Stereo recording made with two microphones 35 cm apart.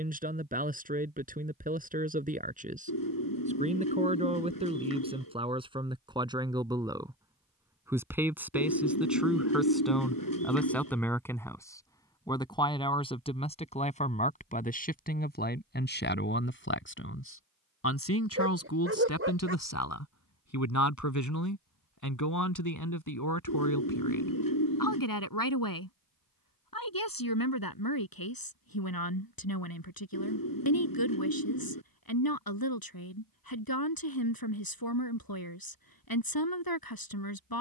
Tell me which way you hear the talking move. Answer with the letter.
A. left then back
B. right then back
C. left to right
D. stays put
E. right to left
E.